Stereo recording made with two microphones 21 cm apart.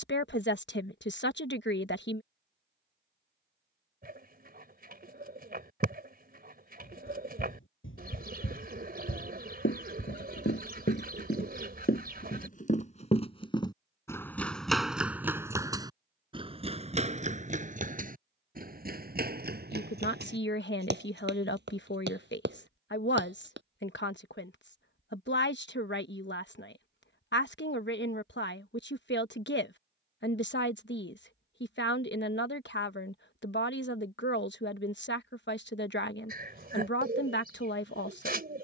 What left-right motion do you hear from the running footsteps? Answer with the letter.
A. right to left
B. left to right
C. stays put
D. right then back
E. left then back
B.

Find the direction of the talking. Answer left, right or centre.
left.